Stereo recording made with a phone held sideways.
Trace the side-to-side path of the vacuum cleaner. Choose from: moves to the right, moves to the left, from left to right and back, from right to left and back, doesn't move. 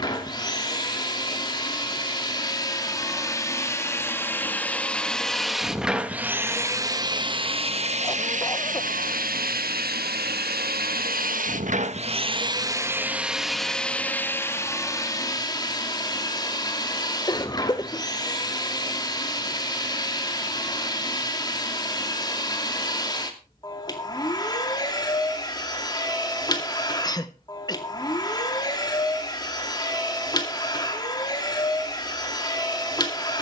from left to right and back.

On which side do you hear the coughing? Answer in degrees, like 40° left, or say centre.
20° left.